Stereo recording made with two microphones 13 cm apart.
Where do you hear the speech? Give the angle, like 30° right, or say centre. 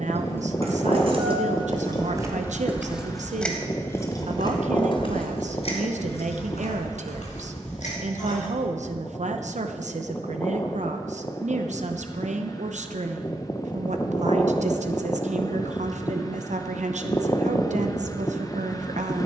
70° right.